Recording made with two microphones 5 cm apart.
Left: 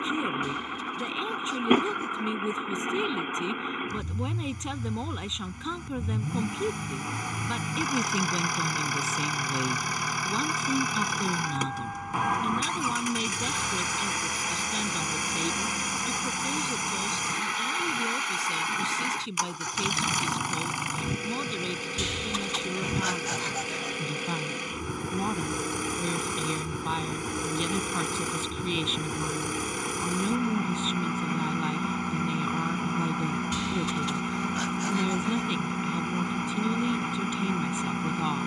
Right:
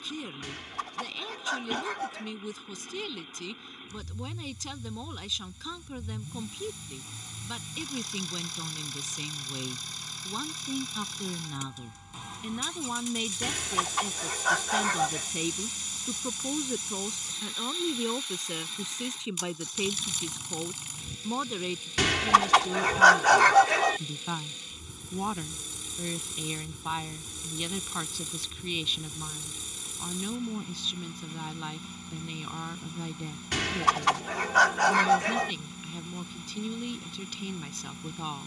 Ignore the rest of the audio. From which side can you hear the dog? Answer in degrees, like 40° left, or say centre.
70° right.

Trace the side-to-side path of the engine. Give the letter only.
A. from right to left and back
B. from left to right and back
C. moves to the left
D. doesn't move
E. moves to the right
D.